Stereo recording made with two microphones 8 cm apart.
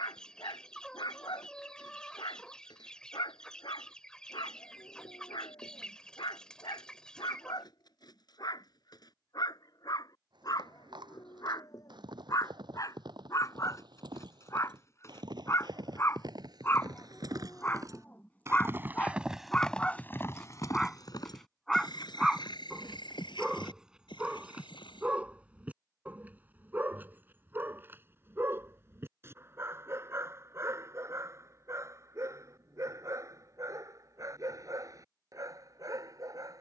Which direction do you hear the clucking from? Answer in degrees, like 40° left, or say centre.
10° left.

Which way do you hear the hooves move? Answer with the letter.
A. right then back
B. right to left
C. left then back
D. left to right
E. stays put
B.